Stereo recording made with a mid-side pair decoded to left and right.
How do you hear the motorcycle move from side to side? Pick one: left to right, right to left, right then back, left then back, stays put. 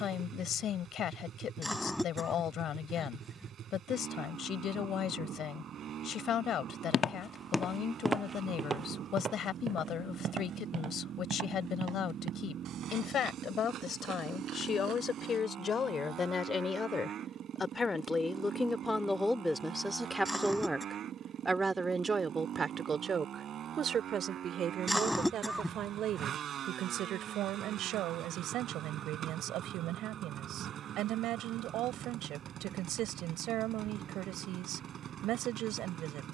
stays put.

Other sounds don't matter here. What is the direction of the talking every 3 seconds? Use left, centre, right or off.
left, left, left, left, left, left, centre, right, right, right, right, right.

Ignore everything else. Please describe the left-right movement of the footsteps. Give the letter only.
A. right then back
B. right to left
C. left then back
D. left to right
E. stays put
D.